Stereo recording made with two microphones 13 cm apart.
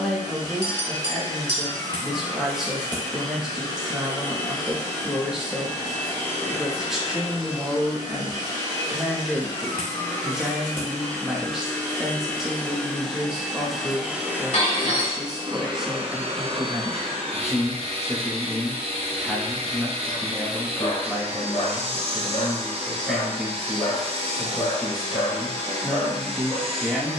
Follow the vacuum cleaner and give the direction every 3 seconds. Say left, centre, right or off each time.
left, left, left, left, centre, right, right, right, right.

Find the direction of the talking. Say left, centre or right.
centre.